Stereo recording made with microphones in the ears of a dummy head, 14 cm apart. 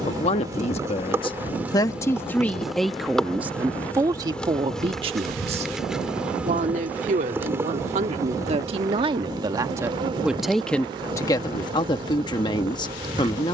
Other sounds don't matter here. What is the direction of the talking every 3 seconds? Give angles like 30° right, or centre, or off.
30° left, 20° right, 40° right, centre, 30° left.